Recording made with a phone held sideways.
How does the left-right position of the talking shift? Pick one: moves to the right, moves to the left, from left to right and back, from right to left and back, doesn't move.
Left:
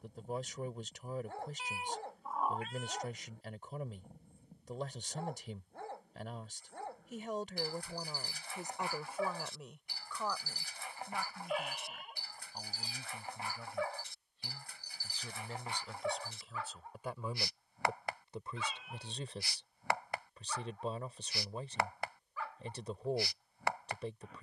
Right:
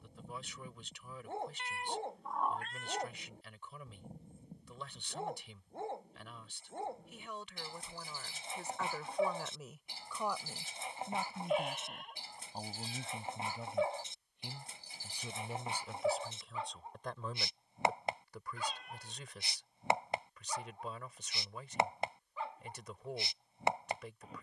from left to right and back.